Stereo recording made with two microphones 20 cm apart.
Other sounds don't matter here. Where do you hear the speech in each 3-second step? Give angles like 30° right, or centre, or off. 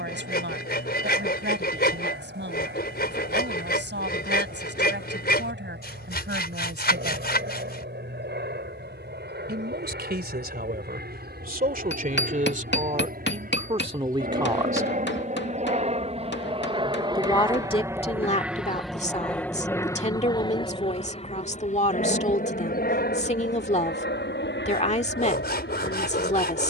70° right, 70° right, 60° right, 50° right, 30° right, 20° left, 30° left, 30° left, 30° left.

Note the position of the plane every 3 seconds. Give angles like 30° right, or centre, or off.
70° right, 70° right, 70° right, 60° right, 50° right, 30° right, 10° left, 40° left, 60° left.